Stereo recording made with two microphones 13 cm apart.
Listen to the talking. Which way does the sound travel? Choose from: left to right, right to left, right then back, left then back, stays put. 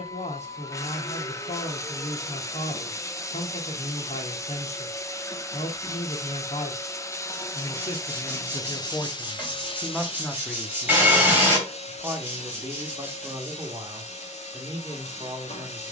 left to right.